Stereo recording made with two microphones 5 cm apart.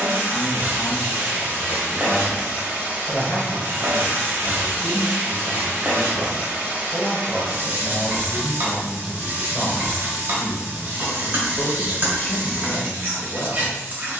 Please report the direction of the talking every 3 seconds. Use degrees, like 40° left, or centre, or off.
20° left, 40° right, 20° right, 10° left, 40° left.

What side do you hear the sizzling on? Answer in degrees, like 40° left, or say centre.
50° right.